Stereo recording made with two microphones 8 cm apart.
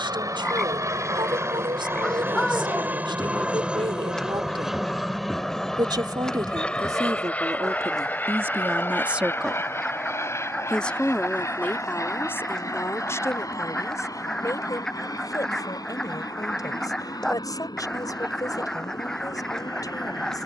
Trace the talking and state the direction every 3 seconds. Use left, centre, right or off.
right, right, right, centre, left, left, left.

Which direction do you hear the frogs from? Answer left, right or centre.
centre.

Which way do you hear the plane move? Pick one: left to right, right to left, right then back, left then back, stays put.
right to left.